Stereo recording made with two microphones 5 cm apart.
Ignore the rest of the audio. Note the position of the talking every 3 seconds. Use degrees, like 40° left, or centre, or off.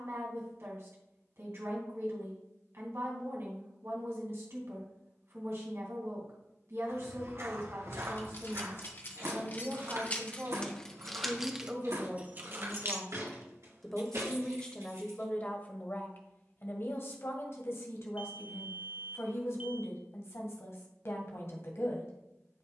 50° right, 50° right, 50° right, 40° right, centre, 40° left, 60° left, 60° left.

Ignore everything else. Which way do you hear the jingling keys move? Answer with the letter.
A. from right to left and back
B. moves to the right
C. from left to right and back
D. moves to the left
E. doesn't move
B.